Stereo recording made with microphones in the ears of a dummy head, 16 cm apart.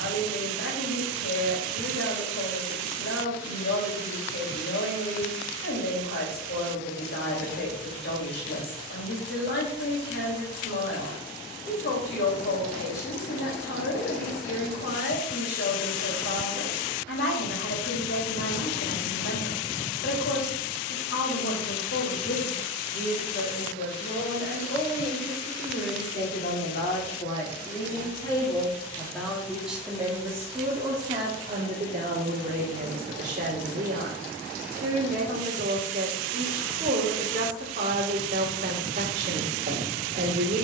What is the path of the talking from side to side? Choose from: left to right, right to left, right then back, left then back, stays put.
left to right.